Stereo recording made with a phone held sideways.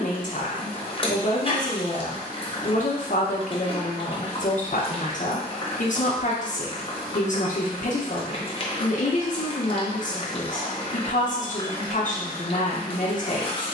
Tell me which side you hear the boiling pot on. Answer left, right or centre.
left.